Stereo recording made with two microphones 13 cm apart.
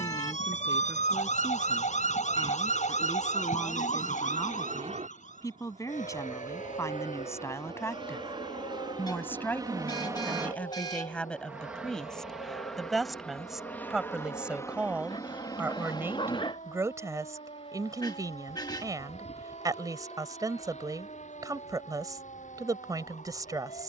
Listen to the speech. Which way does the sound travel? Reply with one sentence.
In this clip you hear the speech travel towards the right.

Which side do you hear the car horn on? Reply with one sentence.
You can hear the car horn on the left.